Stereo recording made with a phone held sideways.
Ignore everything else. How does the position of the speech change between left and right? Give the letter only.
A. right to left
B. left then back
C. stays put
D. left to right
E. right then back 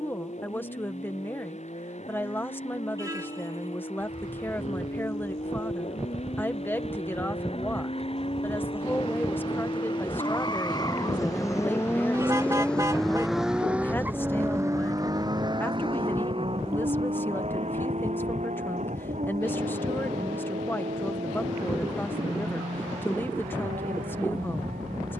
C.